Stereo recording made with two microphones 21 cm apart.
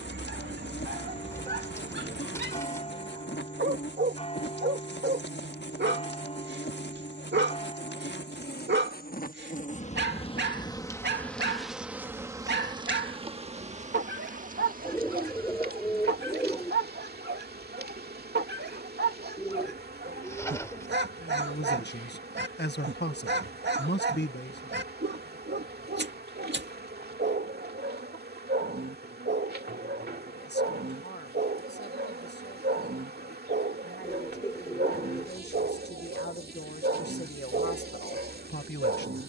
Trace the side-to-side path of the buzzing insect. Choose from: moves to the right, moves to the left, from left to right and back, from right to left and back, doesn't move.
moves to the right.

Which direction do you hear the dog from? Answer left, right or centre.
right.